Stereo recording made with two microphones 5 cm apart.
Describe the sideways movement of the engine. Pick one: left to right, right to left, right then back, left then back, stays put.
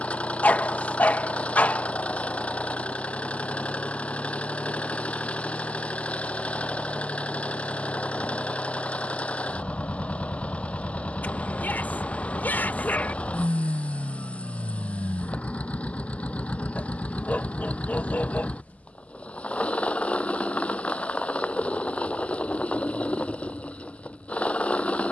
stays put.